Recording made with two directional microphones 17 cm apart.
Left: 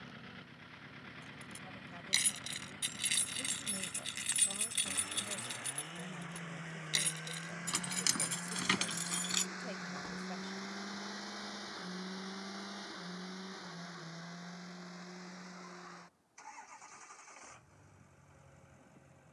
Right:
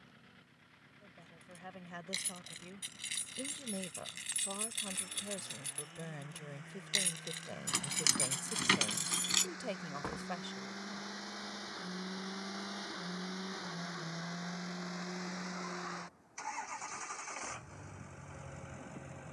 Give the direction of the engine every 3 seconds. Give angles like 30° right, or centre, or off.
50° left, 50° left, 30° left, 10° left, 30° right, 50° right, 70° right.